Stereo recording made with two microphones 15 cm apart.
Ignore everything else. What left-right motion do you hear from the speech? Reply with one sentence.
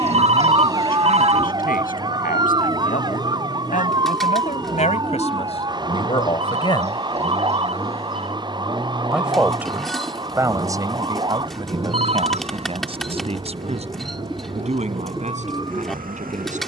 You can hear the speech go from the left side to the right.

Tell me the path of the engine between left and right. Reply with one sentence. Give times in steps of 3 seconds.
You can hear the engine on the left from 0 s, in the centre from 6 s and on the right from 9 s.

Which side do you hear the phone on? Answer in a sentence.
In this clip you hear the phone on the right.